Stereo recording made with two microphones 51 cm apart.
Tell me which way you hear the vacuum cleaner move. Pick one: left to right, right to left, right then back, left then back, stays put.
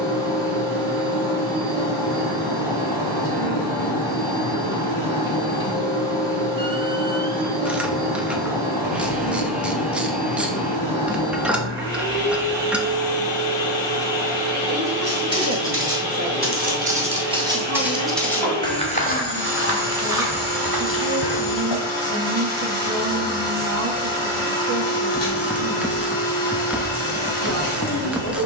stays put.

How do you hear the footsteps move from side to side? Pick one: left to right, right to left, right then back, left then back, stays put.
right to left.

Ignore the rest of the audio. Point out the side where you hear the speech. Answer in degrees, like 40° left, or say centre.
30° right.